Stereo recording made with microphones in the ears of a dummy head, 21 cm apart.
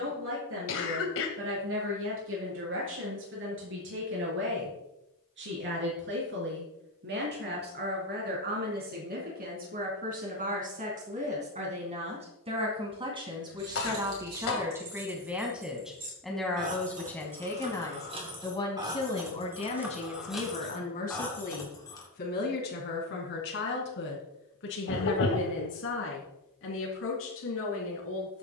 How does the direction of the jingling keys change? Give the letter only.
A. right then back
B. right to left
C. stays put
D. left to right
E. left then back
B.